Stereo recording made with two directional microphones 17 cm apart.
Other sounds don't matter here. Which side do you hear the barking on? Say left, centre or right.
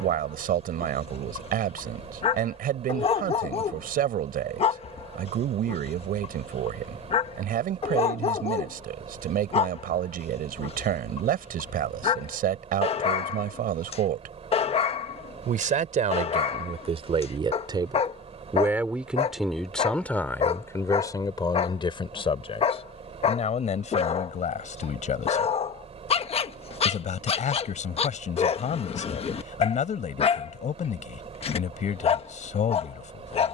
left.